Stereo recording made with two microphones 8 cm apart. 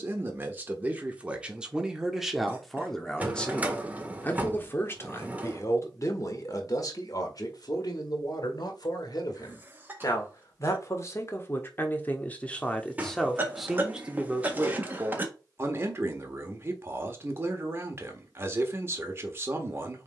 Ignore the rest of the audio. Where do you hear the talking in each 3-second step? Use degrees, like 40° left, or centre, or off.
10° right, 30° left, 50° left, 40° left, centre, 30° right, 30° right.